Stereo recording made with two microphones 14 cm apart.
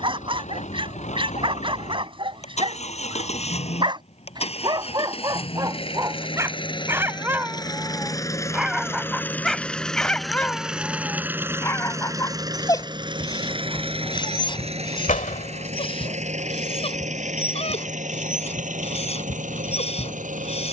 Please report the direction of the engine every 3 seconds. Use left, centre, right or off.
left, left, left, centre, right, right, right.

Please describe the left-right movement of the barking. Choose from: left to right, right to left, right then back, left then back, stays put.
right to left.